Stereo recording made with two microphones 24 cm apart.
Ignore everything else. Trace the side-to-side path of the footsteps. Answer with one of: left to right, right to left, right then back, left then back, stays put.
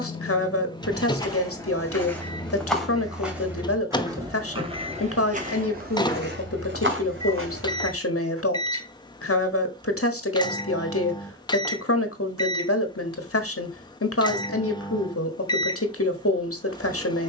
left to right.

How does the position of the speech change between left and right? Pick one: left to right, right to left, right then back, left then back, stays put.
stays put.